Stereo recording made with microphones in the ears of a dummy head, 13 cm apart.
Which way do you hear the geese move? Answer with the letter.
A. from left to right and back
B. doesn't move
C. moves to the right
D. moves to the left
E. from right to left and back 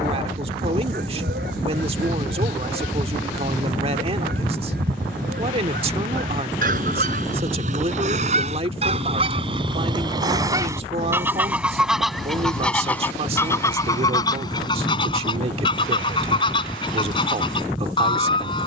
D.